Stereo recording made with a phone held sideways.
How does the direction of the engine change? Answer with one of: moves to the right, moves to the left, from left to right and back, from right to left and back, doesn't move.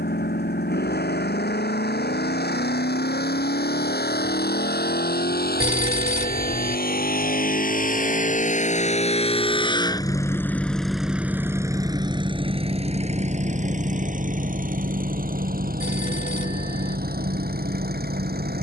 moves to the right.